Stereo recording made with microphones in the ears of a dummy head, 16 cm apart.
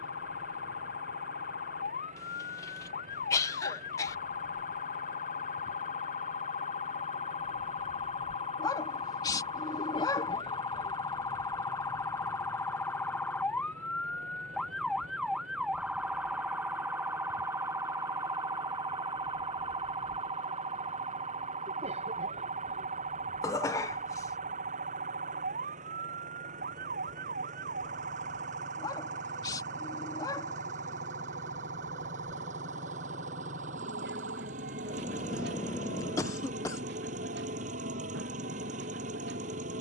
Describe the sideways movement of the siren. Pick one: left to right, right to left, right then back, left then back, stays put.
left to right.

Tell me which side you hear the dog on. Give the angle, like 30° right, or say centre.
20° left.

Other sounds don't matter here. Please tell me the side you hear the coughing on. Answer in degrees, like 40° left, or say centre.
20° left.